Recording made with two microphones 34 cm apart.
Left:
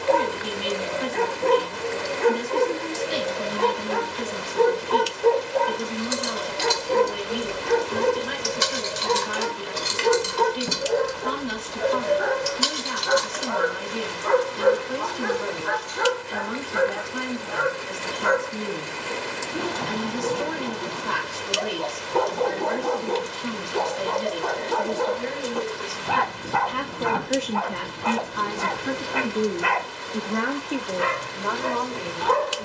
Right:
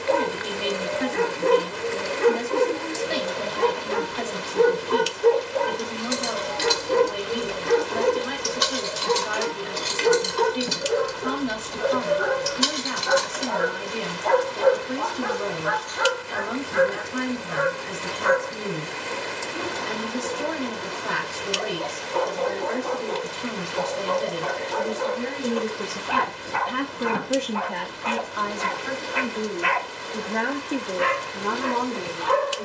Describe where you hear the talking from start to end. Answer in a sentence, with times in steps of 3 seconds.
In this clip you hear the talking on the right from 0 s, on the left from 27 s and on the right from 30 s.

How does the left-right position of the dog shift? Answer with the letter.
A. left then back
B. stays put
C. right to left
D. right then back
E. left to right
C.